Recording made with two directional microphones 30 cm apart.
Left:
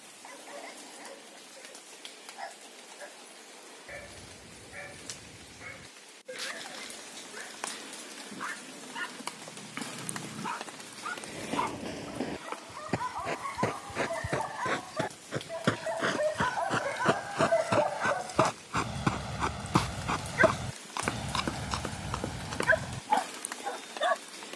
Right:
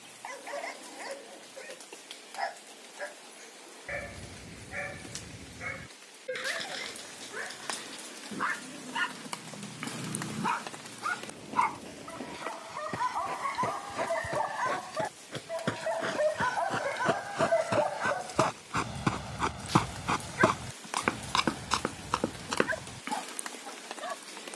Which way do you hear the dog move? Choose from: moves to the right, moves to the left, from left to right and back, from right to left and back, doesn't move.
moves to the left.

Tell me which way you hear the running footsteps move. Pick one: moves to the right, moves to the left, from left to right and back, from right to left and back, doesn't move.
moves to the right.